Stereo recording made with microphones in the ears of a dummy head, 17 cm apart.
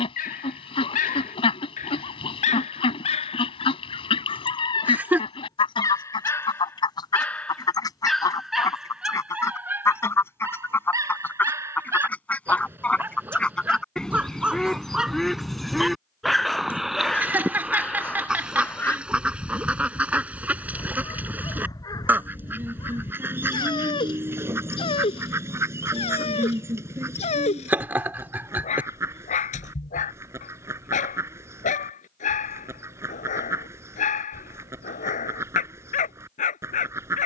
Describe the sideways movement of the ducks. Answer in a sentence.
In this clip you hear the ducks go from the left side to the right.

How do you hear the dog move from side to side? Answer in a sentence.
In this clip you hear the dog move from left to right and back again.